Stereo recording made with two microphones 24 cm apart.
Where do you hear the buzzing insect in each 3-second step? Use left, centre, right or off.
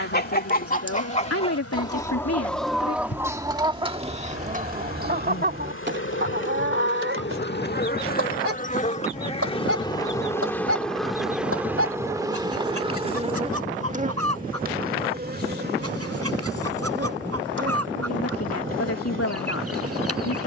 left, left, left, centre, right, right, right.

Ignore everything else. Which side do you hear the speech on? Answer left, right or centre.
left.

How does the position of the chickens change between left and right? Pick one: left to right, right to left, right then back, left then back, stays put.
left to right.